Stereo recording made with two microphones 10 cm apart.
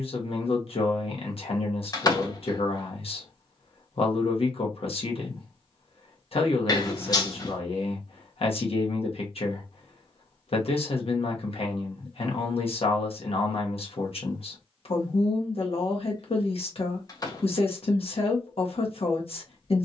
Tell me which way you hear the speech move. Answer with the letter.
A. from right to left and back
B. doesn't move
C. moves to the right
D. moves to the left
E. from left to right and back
B.